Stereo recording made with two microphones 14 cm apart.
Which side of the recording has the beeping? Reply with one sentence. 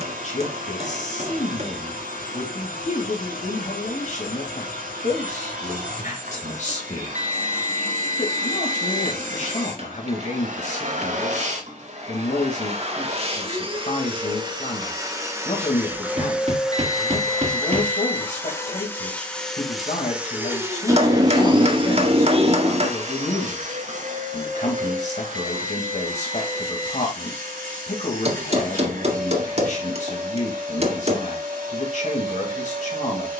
In this clip you hear the beeping on the right.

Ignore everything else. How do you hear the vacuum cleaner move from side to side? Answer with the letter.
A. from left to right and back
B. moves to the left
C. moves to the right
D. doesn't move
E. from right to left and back
E.